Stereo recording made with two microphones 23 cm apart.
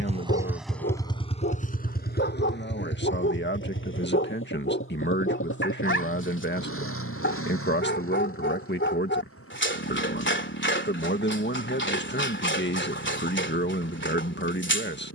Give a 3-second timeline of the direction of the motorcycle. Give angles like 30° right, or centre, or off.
20° left, 60° left, 70° left, 70° left, 70° left.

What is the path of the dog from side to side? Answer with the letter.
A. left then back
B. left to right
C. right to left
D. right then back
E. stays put
E.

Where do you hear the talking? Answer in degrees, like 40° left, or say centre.
50° left.